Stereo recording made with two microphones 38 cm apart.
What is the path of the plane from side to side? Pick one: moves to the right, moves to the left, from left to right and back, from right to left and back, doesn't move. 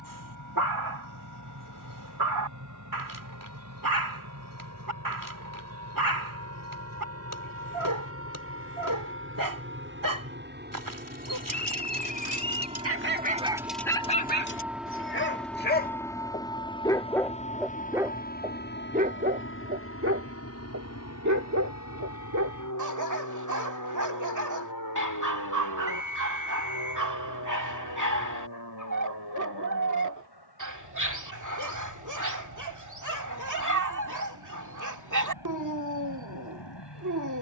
moves to the left.